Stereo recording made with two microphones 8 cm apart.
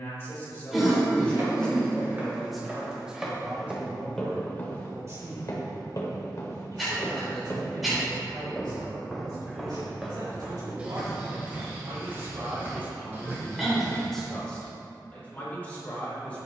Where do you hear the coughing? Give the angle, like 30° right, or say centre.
centre.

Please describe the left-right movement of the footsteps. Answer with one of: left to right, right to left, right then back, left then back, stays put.
left then back.